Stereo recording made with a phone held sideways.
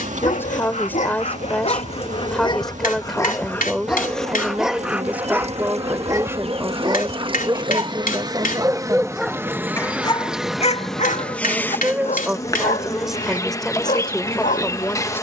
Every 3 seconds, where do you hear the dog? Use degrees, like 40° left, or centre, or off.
50° left, centre, 30° right, 30° left, 60° left.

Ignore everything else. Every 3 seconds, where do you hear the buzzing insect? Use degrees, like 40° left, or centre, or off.
60° right, 50° right, 30° right, centre, 20° left.